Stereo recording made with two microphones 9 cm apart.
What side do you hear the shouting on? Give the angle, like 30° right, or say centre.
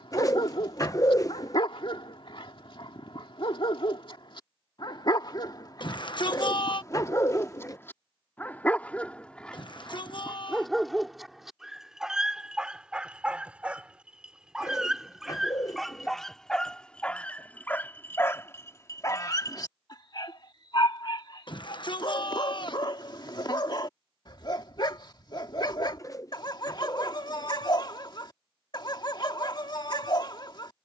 50° left.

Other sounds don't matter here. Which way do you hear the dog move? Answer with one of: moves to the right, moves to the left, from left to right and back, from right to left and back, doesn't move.
from left to right and back.